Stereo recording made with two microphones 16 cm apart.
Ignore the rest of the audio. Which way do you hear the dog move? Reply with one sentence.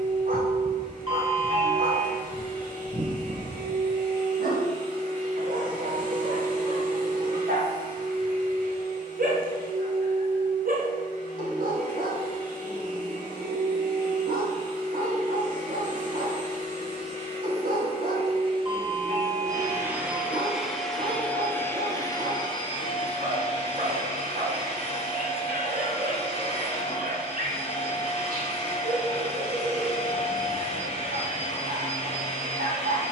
In this clip you hear the dog stay in one place.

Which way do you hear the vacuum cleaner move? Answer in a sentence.
In this clip you hear the vacuum cleaner move from right to left.